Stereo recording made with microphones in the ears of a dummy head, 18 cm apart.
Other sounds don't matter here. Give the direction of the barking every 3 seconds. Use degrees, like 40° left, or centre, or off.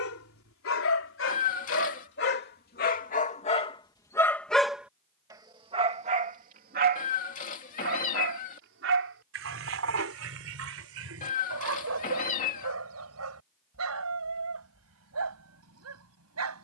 60° left, 10° left, 50° right, 70° right, 70° right, 70° right.